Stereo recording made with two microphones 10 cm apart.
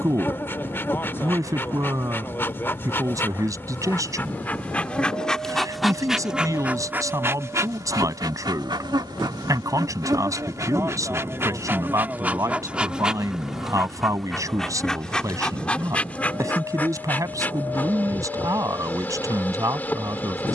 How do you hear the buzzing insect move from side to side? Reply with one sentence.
In this clip you hear the buzzing insect move from left to right and back again.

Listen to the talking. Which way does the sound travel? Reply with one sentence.
You can hear the talking stay put.